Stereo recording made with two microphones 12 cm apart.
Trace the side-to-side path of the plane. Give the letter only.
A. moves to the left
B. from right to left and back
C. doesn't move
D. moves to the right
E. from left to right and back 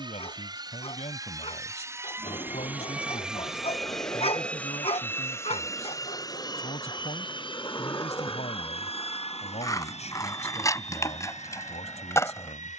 A.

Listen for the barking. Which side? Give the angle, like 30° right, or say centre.
50° left.